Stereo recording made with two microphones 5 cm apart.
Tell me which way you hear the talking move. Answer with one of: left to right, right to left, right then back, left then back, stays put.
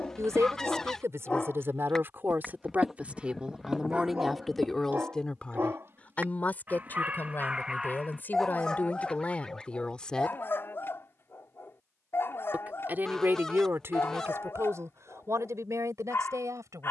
left then back.